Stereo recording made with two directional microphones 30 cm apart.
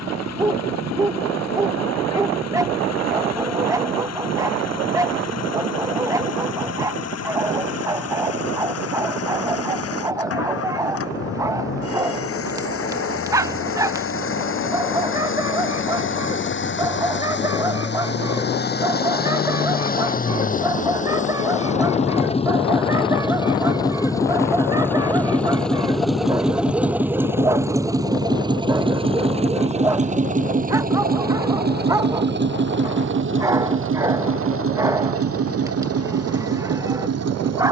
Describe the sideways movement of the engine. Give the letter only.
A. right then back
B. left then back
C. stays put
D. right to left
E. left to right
E.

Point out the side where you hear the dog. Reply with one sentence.
You can hear the dog in the centre.